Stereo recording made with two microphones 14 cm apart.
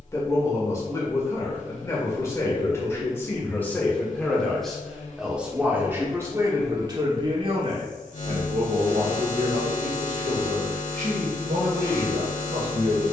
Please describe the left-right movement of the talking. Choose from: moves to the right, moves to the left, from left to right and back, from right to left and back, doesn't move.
moves to the right.